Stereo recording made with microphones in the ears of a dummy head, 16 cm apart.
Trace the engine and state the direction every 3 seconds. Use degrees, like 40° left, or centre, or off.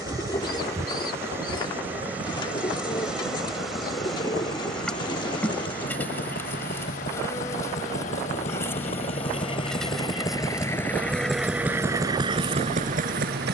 50° left, 50° left, 40° left, 10° left, 40° right.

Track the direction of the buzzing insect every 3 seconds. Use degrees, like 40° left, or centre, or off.
10° right, centre, 20° left, centre, 20° right.